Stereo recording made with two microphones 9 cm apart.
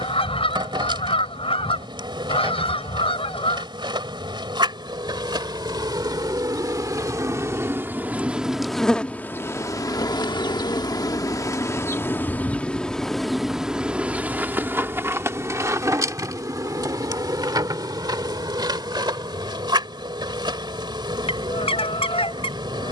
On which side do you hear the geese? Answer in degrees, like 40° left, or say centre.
80° left.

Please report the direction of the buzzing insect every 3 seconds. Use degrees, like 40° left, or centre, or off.
50° right, 50° right, 30° right, 30° left, centre, 40° right, 50° right, 50° right.